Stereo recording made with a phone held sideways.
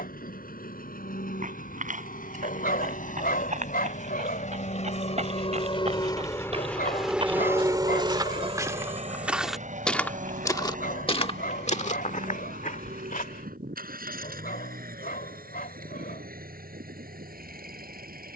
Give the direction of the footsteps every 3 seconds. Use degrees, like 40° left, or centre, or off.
60° right, 50° right, 40° right, 20° left, 60° left, off.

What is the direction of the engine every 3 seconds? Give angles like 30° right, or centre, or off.
70° left, 50° left, 10° right, 60° right, 70° right, 80° right.